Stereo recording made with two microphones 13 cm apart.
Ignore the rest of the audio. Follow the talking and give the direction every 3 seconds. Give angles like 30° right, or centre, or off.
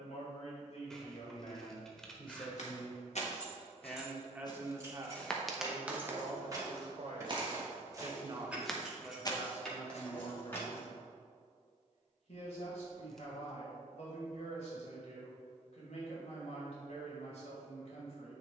50° left, 20° right, 50° right, 30° left, 60° left, 60° left.